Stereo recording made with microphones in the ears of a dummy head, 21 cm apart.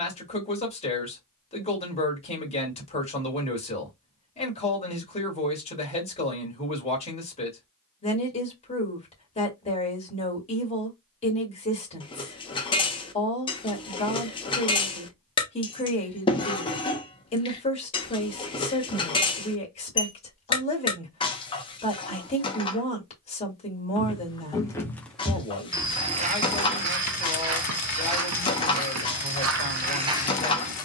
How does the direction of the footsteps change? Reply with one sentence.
You can hear the footsteps go right and come back.